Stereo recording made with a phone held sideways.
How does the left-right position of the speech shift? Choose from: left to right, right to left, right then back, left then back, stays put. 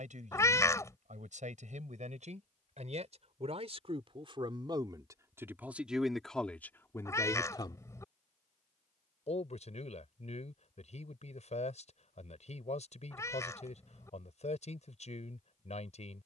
right to left.